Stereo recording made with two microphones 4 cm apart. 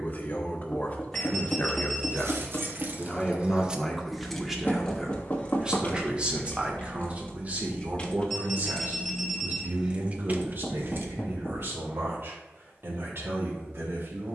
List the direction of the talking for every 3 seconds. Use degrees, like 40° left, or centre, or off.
30° left, 10° right, 40° right, 60° right, 70° right.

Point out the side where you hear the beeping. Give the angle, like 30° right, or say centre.
10° left.